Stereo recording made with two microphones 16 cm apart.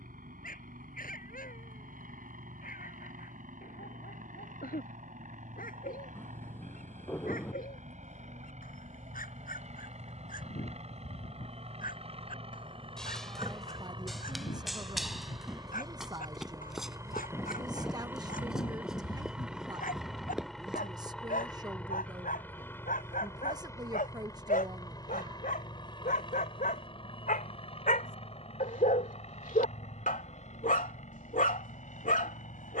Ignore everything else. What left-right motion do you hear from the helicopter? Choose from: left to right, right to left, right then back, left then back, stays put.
right to left.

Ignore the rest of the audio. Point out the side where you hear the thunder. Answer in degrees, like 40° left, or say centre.
10° left.